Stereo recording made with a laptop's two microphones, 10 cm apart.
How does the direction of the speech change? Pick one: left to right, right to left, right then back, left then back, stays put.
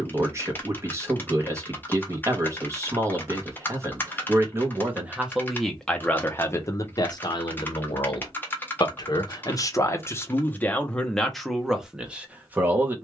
left then back.